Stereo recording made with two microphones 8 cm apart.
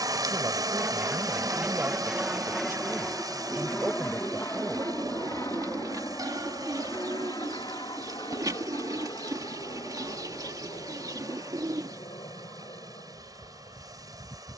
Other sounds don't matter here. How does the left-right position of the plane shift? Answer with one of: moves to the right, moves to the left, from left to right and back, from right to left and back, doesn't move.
moves to the left.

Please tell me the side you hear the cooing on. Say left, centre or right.
right.